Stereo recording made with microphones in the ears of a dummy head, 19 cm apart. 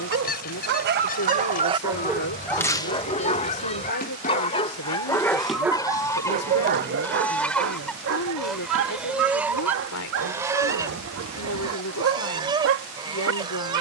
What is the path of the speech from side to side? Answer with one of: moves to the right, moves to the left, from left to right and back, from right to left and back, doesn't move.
doesn't move.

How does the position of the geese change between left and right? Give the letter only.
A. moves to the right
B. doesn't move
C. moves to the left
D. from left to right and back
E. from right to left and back
A.